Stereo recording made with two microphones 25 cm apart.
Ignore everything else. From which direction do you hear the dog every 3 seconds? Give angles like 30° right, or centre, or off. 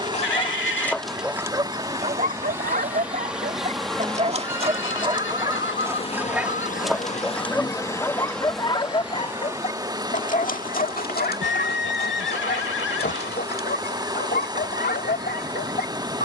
10° right, 20° right, 10° left, 30° left, 40° left, 40° left.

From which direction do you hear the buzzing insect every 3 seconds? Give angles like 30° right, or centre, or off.
10° right, 10° left, 20° left, 10° right, 20° right, 20° right.